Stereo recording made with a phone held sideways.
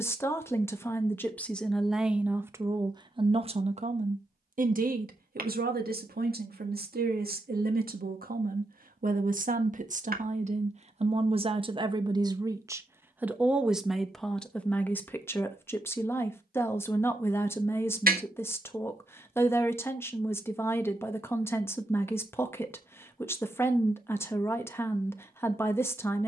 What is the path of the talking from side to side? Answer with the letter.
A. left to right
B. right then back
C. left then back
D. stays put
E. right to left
B.